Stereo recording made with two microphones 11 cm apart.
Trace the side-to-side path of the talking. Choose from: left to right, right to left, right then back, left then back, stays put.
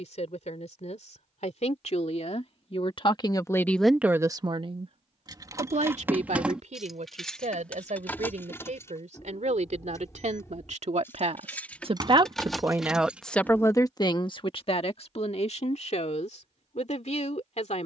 right then back.